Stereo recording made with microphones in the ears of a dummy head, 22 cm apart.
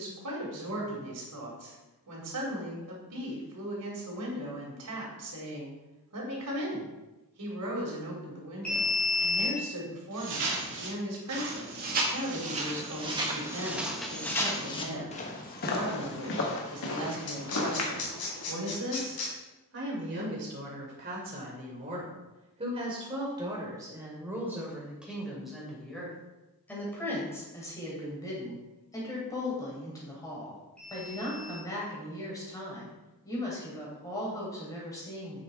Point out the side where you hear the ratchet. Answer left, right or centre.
left.